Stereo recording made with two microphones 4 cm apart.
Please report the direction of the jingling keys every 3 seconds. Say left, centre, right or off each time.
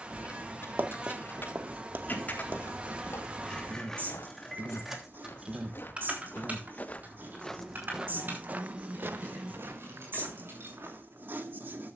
left, centre, right, right.